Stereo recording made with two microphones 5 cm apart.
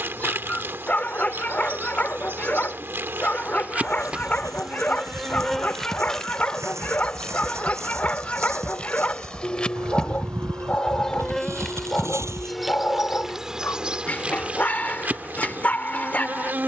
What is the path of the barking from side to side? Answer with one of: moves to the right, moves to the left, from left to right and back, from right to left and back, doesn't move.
doesn't move.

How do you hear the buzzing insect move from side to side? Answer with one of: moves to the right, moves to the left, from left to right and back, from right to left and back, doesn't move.
from right to left and back.